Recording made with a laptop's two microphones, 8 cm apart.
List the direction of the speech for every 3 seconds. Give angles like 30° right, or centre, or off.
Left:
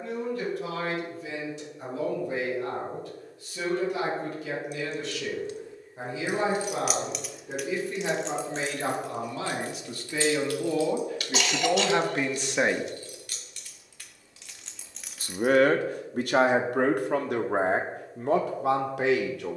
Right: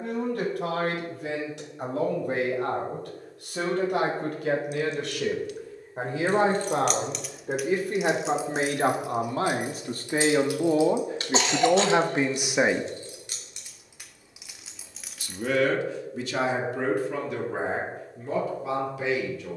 70° right, 60° right, 50° right, 40° right, 10° right, 60° left, 70° left.